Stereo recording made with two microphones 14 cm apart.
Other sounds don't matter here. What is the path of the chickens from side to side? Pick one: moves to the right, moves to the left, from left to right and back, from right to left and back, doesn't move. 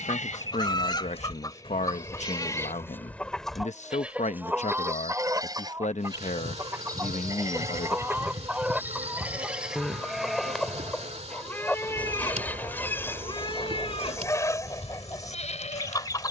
from left to right and back.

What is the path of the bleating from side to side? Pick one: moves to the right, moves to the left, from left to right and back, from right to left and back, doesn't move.
from left to right and back.